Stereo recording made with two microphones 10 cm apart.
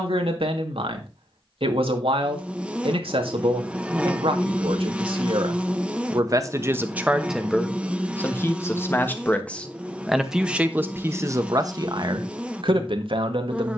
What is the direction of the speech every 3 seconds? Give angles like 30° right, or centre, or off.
70° right, 70° right, centre, 10° right, 60° right.